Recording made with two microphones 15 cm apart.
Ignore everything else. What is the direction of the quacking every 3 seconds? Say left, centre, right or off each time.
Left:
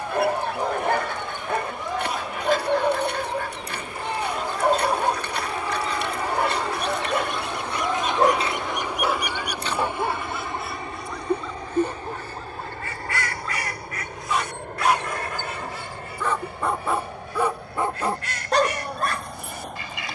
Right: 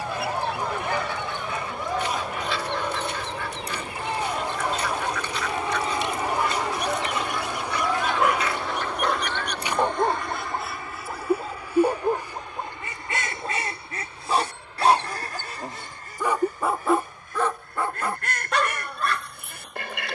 left, left, left, centre, right, right, right.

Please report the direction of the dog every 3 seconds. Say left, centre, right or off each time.
left, left, left, right, right, centre, left.